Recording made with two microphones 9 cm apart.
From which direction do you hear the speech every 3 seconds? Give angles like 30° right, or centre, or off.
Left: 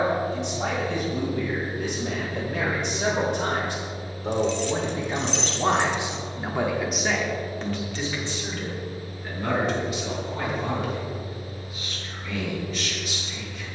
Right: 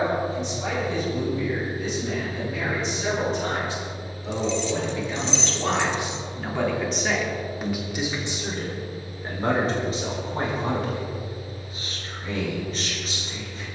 70° left, 40° left, 10° right, 40° right, 40° right.